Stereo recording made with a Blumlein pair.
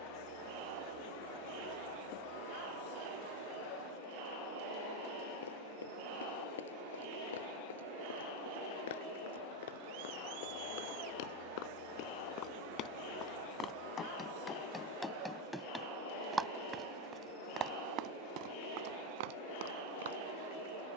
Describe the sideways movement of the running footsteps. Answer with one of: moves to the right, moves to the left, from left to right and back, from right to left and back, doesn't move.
moves to the right.